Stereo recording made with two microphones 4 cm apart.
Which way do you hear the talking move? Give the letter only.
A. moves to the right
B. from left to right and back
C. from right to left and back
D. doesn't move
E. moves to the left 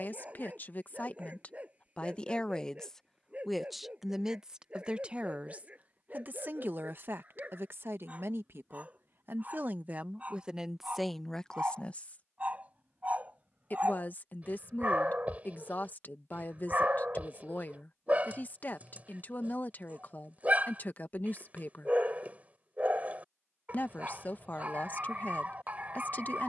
B.